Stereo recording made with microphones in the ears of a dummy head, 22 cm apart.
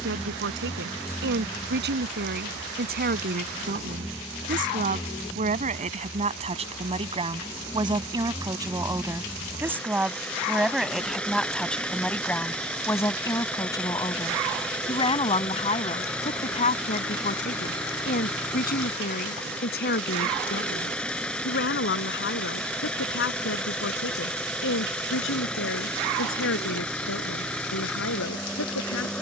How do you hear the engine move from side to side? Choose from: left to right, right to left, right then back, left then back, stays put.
stays put.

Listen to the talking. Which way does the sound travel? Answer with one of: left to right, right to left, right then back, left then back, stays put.
right to left.